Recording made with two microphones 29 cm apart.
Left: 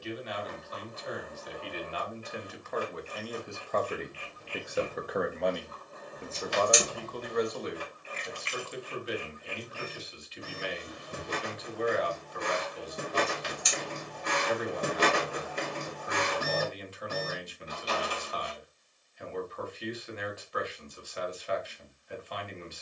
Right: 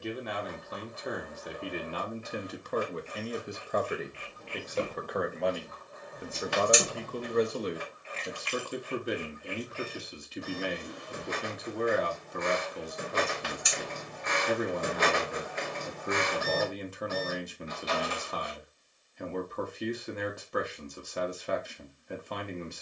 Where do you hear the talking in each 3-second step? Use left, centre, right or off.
right, centre, right, right, right, right, right, right.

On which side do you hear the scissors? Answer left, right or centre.
right.